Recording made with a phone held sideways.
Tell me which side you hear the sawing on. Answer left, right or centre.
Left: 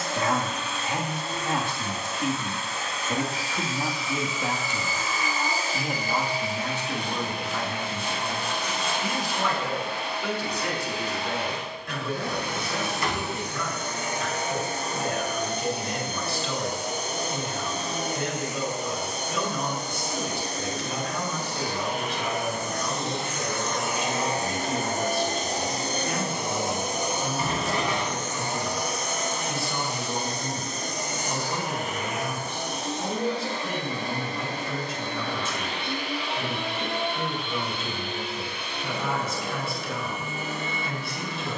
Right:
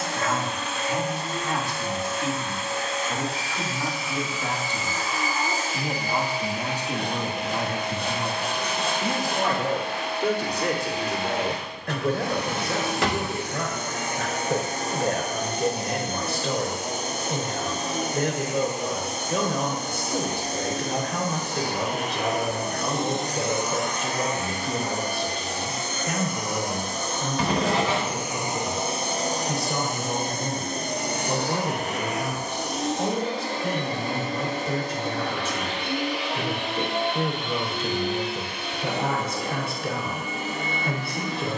right.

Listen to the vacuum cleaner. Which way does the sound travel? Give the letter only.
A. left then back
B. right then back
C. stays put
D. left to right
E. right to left
A.